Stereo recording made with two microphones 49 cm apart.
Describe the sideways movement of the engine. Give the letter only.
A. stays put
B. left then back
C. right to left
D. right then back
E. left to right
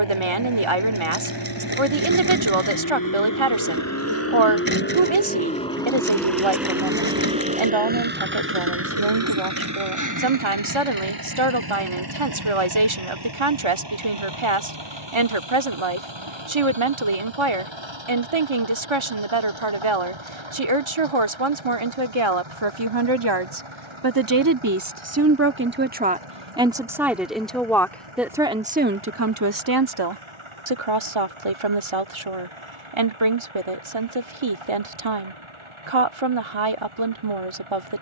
E.